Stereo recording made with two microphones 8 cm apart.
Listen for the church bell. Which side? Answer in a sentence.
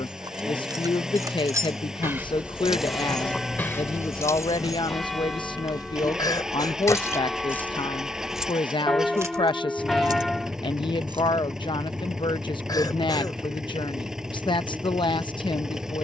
You can hear the church bell in the centre.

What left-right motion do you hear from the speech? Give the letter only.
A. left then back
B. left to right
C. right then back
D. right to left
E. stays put
E.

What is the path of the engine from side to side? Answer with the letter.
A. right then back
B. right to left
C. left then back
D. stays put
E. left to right
D.